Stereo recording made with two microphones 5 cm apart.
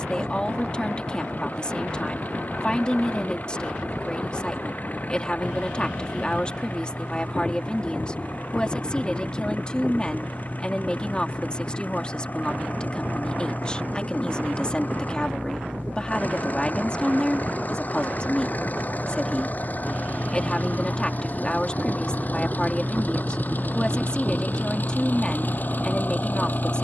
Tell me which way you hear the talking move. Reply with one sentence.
In this clip you hear the talking stay put.